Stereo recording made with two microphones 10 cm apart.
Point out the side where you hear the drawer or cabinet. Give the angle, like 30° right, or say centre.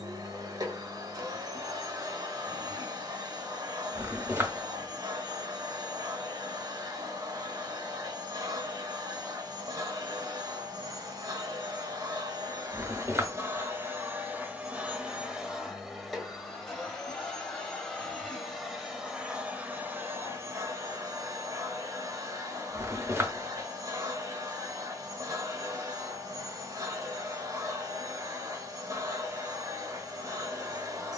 30° right.